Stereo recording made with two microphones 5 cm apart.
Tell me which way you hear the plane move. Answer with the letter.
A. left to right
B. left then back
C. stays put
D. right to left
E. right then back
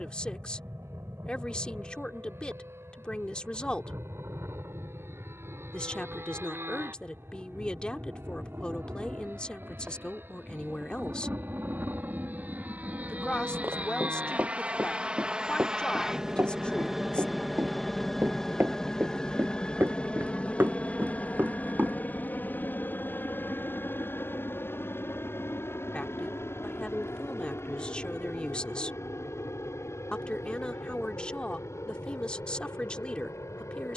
D.